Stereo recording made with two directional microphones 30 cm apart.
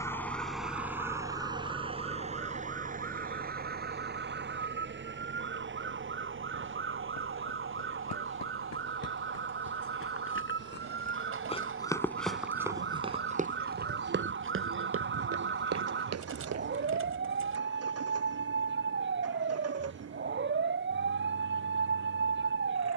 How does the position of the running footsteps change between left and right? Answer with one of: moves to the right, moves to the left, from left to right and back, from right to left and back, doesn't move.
moves to the right.